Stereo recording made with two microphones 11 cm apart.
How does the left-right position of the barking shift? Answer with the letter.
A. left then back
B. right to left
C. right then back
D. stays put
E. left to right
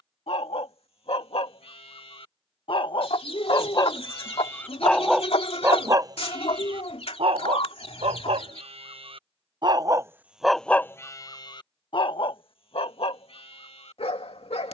C.